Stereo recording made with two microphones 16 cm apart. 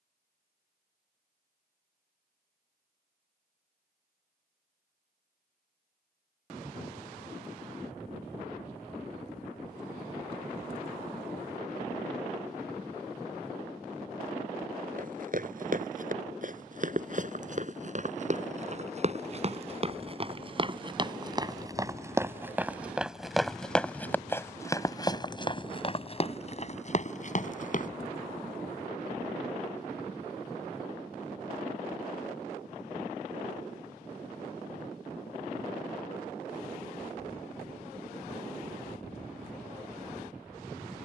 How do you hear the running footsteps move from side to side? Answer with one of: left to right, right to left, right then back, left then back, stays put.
right to left.